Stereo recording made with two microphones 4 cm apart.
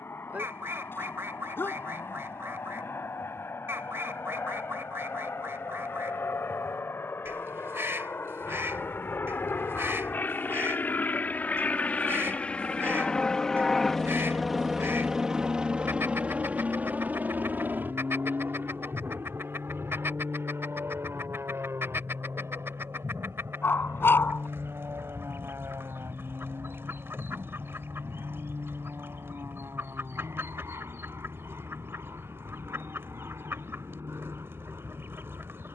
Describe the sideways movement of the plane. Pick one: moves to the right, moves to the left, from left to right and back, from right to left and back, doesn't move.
moves to the right.